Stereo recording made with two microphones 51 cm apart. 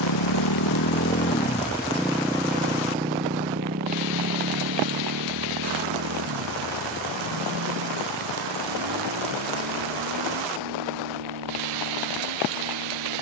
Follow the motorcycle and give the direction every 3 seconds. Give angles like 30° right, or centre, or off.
20° left, 30° right, 40° right, 50° right, 50° right.